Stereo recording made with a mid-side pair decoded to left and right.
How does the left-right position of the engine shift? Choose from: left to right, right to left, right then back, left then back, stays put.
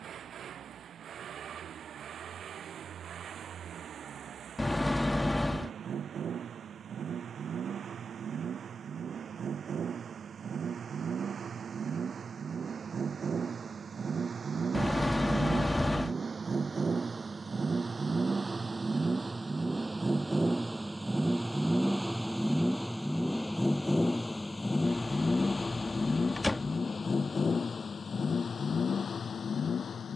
right to left.